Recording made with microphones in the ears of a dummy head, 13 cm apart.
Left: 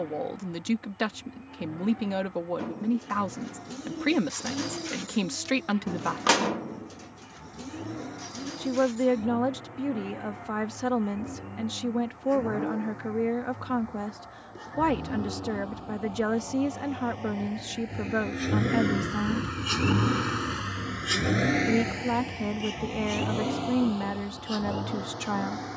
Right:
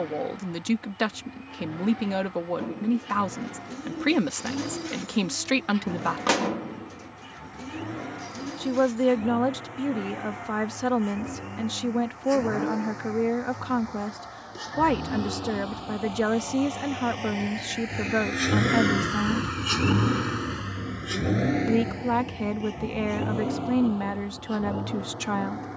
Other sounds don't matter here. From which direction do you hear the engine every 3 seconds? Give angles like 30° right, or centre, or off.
80° right, 80° right, 80° right, 80° right, 70° right, 60° right, 10° right, 60° left, 80° left.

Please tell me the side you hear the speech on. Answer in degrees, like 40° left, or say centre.
10° right.